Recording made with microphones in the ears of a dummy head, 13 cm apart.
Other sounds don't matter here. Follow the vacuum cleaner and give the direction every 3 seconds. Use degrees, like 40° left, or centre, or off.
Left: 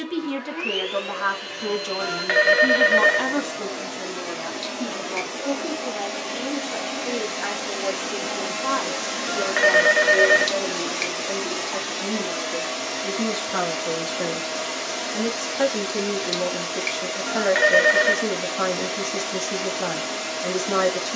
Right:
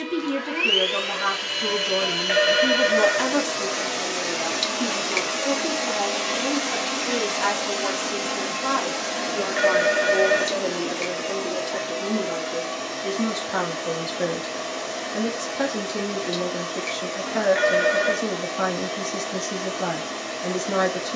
50° right, 40° right, 10° right, 30° left, 50° left, 50° left, 50° left.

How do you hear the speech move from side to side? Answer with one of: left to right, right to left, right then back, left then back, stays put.
right then back.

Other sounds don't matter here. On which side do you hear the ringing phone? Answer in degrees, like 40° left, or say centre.
50° left.